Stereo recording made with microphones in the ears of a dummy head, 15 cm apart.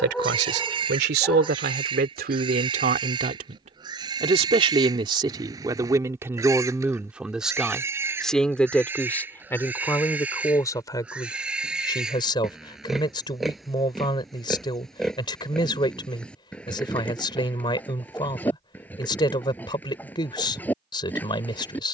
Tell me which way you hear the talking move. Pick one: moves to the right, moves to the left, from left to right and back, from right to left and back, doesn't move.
moves to the left.